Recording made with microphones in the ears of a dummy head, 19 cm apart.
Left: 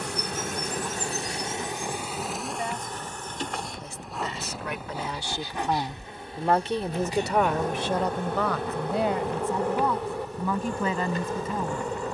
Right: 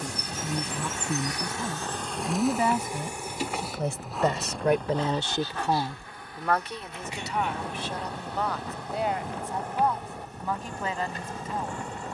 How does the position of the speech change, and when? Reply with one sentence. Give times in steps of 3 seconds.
In this clip you hear the speech on the right from 0 s and on the left from 6 s.